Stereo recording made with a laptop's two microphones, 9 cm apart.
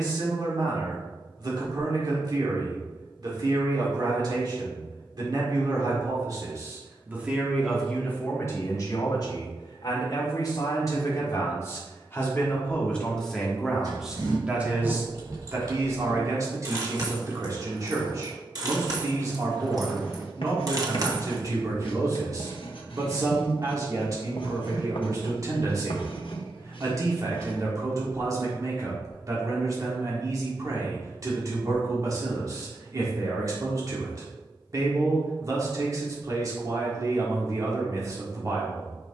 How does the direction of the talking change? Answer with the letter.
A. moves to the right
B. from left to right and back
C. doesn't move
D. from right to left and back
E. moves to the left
D.